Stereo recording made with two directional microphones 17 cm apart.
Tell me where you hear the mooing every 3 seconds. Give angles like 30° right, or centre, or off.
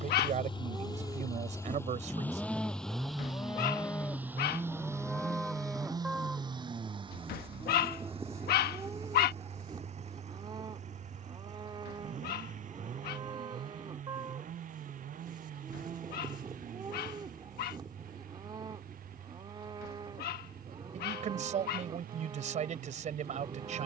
10° right, 10° left, 10° right, 30° right, 30° right, 30° right, 30° right, 30° right.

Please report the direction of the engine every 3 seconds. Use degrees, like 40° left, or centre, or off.
20° left, 10° right, 30° right, 40° right, 50° right, 50° right, 60° right, 60° right.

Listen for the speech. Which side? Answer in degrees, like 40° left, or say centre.
50° right.